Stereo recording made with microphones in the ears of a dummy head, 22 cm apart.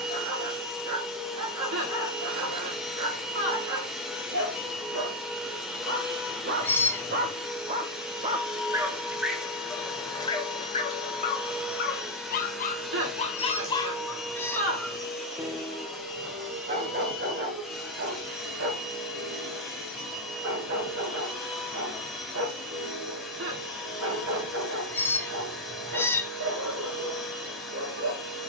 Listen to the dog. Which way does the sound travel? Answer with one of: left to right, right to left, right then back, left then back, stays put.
left then back.